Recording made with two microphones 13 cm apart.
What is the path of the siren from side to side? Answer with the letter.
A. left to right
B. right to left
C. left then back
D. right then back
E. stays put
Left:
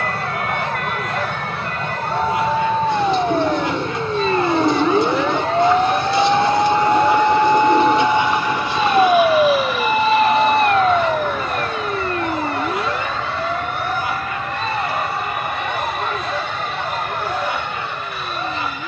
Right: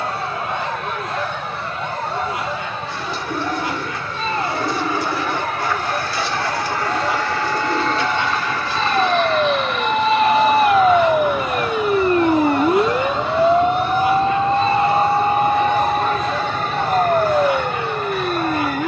A.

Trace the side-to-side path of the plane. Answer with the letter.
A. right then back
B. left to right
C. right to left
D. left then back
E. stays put
B.